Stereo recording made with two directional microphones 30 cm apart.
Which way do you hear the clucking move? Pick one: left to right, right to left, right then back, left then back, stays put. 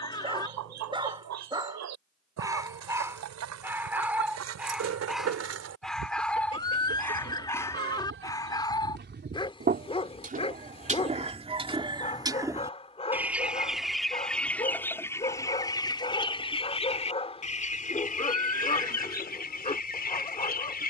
right to left.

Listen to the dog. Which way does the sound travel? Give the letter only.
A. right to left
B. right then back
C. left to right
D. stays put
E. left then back
A.